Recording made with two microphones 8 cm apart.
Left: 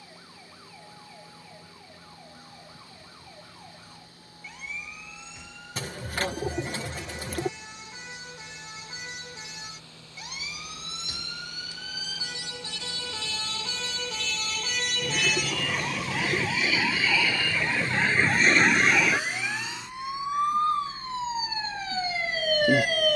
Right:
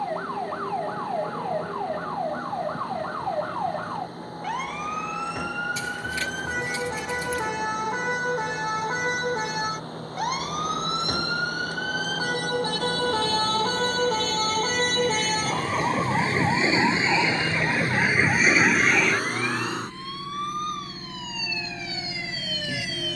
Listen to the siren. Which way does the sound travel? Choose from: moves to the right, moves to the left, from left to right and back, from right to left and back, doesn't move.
moves to the left.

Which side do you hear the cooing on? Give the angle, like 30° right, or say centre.
50° left.